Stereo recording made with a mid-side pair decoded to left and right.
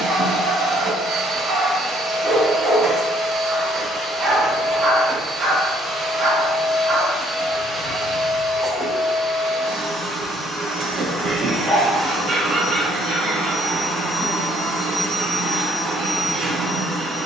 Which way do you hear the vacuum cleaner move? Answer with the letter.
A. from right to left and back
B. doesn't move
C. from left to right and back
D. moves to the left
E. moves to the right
B.